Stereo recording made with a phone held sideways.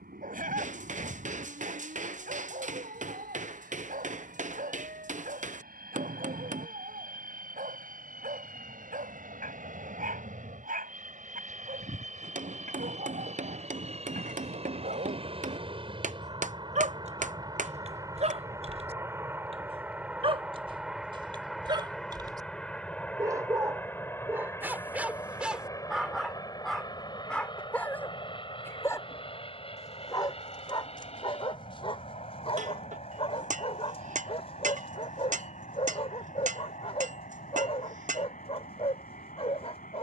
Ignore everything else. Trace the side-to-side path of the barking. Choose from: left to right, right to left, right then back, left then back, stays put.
right to left.